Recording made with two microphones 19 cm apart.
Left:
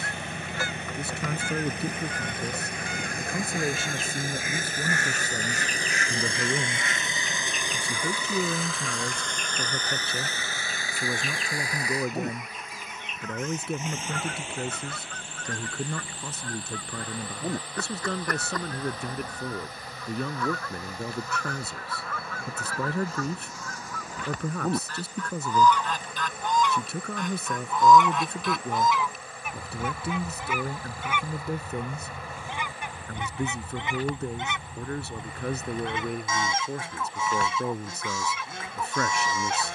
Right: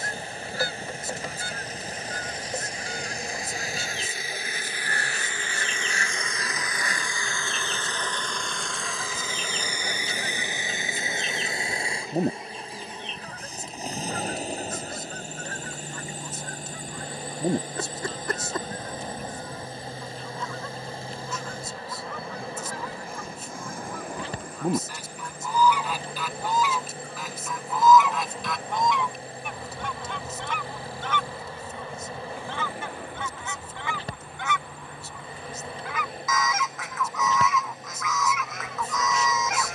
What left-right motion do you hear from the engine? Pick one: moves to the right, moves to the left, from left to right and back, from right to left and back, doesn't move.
moves to the right.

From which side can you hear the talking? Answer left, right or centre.
left.